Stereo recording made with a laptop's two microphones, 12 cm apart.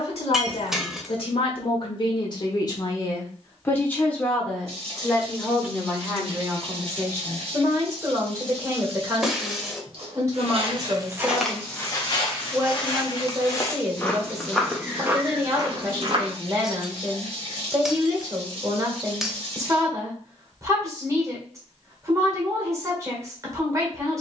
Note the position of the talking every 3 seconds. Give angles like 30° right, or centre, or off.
50° left, 10° left, 20° right, 30° right, 30° right, 30° right, 30° right, 30° right.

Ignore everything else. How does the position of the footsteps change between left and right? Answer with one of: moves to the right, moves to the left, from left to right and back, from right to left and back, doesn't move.
from right to left and back.